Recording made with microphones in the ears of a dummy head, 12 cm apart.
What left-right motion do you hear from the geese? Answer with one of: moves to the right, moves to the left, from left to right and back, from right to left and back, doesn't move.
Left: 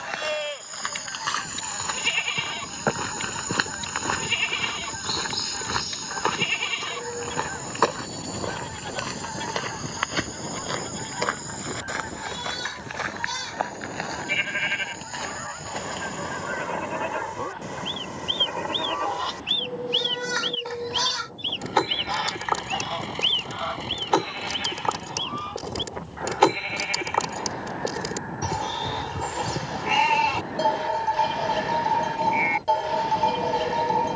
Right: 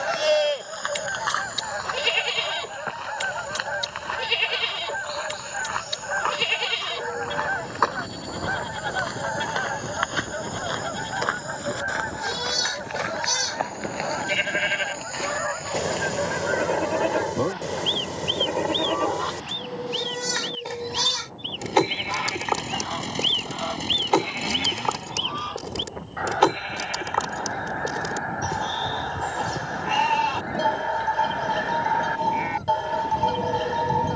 from right to left and back.